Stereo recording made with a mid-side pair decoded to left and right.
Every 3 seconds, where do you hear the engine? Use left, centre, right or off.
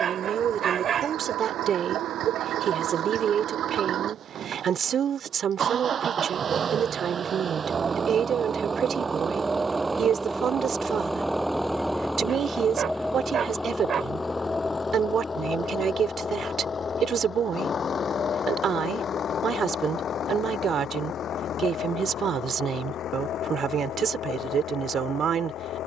right, right, right, centre, centre, left, left, left, left.